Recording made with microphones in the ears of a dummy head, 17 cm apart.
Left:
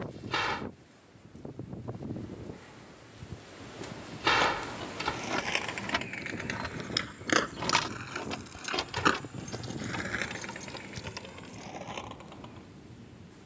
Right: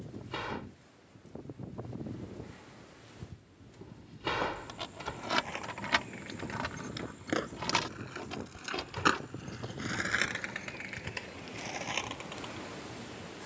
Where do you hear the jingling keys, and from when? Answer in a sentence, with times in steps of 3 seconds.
In this clip you hear the jingling keys not at all from 0 s, on the right from 3 s, in the centre from 6 s, on the left from 9 s and not at all from 12 s.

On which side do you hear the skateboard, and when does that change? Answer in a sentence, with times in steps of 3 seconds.
In this clip you hear the skateboard not at all from 0 s, on the left from 3 s and on the right from 9 s.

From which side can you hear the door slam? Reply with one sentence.
In this clip you hear the door slam on the left.